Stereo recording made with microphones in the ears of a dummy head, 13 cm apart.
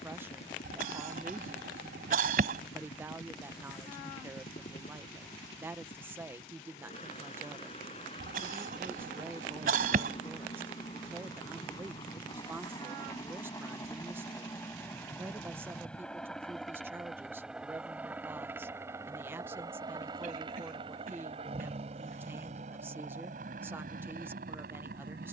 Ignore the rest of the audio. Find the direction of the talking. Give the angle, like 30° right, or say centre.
10° right.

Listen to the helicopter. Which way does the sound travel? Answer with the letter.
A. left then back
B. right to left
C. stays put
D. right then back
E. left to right
E.